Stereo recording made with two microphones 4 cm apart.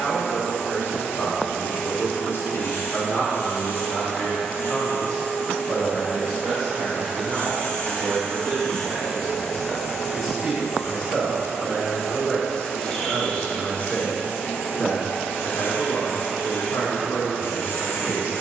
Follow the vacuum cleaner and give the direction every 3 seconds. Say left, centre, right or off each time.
left, left, left, centre, left, left.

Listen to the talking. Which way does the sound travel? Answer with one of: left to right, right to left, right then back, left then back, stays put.
right then back.